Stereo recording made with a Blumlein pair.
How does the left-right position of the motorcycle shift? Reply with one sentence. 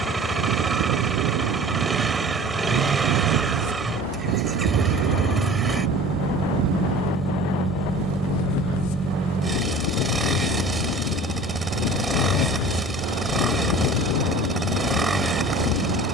You can hear the motorcycle stay in one place.